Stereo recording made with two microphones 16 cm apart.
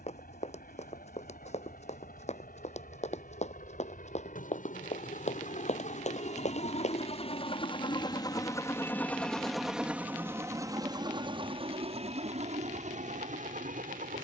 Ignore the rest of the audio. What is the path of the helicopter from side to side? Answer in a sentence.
You can hear the helicopter go from the left side to the right.